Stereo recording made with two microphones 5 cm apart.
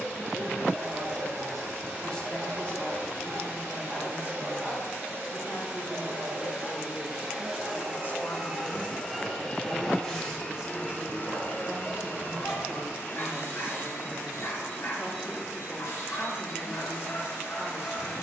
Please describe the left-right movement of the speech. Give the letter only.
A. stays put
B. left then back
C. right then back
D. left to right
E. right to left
B.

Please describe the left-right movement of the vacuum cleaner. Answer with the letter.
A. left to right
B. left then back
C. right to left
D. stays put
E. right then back
C.